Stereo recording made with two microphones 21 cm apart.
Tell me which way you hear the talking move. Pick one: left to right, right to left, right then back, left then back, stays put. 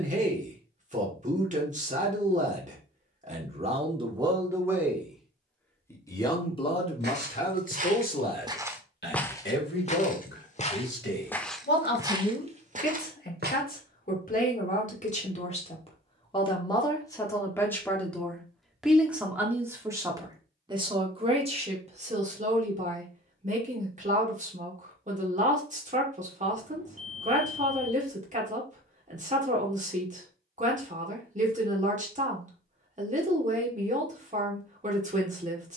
left then back.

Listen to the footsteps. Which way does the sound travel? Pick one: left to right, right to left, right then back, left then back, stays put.
left then back.